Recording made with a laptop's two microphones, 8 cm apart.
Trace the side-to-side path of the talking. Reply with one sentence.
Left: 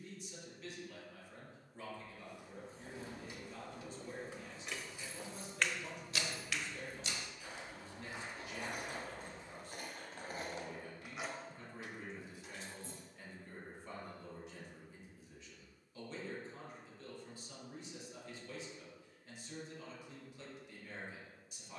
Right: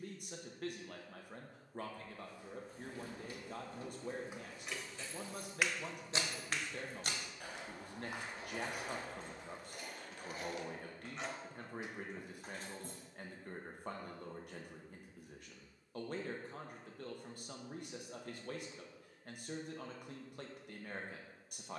You can hear the talking stay put.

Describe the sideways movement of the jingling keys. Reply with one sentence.
You can hear the jingling keys go left and come back.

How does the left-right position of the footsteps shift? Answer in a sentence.
In this clip you hear the footsteps go from the left side to the right.